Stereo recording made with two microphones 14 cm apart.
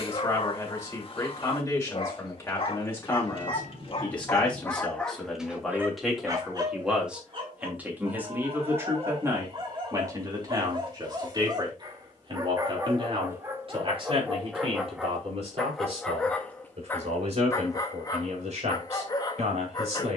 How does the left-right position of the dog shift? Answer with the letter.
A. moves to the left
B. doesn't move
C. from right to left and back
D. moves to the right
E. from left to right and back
E.